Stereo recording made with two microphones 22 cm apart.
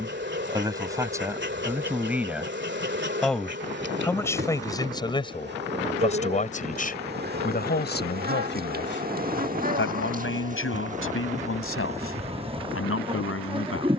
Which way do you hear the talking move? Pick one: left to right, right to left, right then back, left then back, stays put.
right to left.